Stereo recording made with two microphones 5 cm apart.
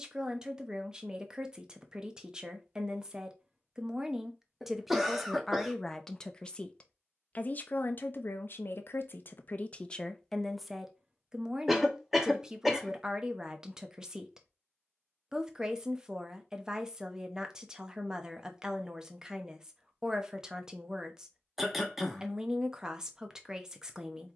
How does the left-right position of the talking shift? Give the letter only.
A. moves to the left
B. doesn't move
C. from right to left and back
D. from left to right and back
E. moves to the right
C.